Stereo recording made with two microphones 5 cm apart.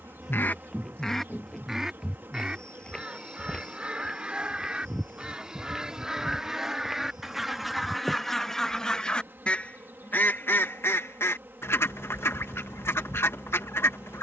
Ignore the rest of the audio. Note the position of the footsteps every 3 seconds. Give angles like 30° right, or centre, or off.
10° left, 10° left, 10° right, off, off.